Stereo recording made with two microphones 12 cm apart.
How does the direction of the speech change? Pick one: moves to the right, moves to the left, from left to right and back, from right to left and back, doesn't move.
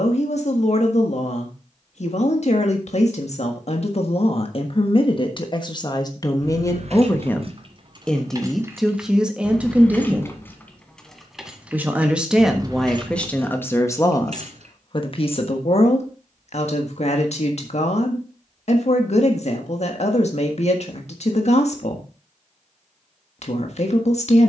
from left to right and back.